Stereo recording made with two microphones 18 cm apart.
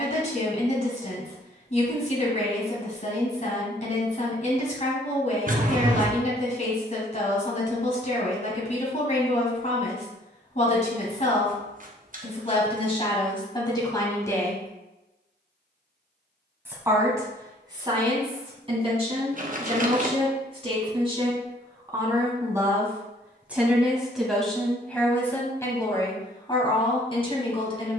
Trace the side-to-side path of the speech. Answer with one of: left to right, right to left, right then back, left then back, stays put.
right then back.